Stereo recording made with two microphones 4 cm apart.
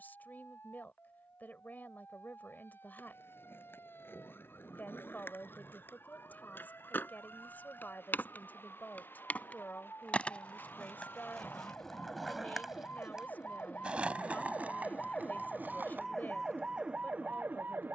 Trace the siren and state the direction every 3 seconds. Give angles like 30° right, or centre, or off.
70° left, 70° left, 60° left, 60° left, 40° left, 20° right.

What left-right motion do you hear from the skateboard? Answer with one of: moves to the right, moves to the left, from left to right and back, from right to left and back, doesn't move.
moves to the right.